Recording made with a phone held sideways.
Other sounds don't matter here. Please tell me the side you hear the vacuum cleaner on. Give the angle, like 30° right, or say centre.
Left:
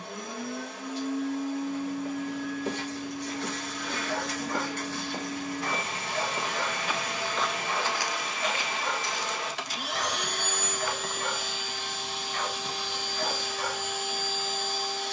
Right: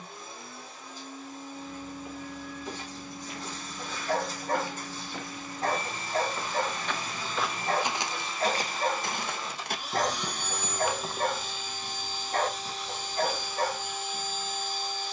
70° left.